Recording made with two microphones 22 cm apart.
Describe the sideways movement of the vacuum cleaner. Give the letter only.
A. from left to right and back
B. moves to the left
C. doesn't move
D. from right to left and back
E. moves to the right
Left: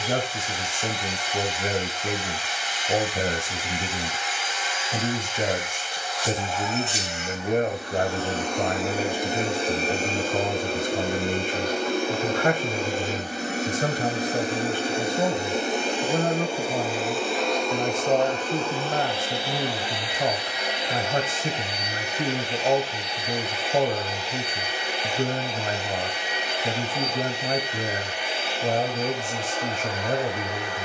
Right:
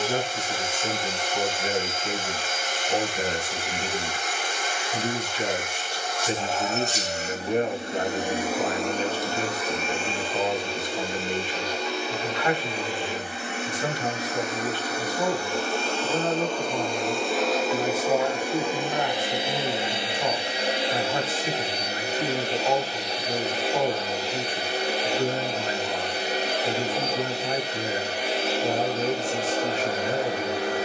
D.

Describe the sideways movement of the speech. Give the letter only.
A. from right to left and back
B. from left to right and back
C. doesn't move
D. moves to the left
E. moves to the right
C.